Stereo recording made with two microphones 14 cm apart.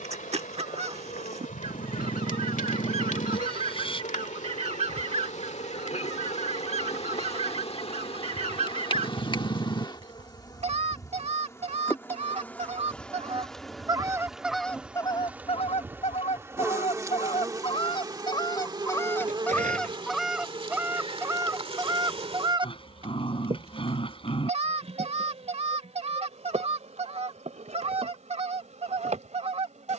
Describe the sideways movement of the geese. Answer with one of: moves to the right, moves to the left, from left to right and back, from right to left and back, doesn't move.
from right to left and back.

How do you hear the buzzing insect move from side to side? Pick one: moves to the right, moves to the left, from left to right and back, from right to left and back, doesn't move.
moves to the right.